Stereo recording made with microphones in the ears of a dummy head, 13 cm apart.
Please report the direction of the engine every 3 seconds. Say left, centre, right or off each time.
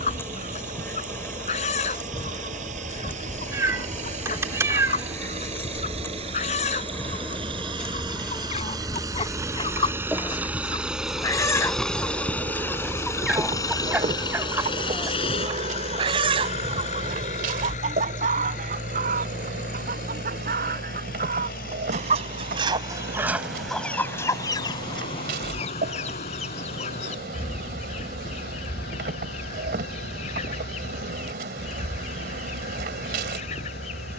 right, right, right, centre, left, left, left, left, left, left, left, left.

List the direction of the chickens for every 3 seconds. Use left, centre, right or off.
left, left, left, left, centre, right, right, right, left, left, left, left.